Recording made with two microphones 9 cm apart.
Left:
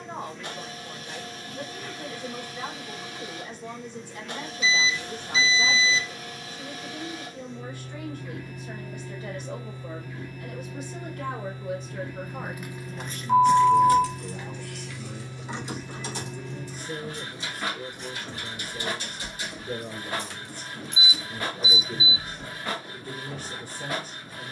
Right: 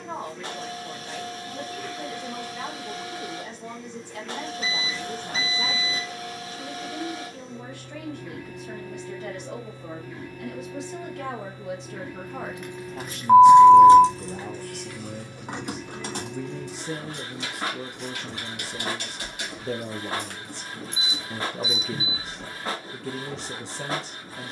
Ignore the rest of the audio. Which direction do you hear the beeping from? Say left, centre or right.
right.